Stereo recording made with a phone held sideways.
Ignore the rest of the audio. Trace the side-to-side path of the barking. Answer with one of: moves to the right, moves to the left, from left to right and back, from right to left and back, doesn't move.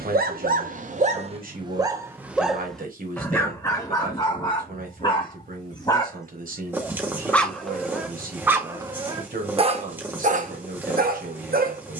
from right to left and back.